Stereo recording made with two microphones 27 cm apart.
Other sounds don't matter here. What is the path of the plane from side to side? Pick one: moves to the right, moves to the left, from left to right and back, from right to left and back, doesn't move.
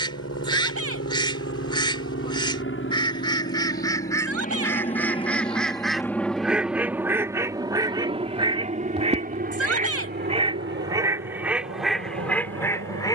moves to the right.